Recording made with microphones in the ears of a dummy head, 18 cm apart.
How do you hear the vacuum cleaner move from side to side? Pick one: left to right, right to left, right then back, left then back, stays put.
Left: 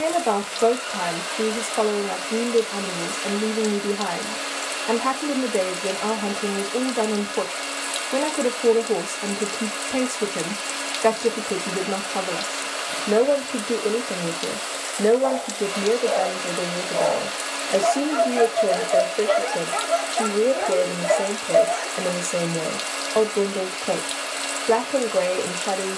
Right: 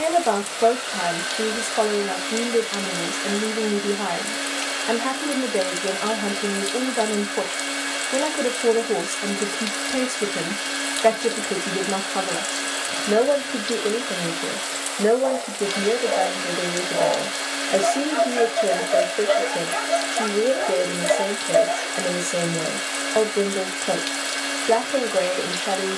stays put.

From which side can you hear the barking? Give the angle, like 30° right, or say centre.
10° right.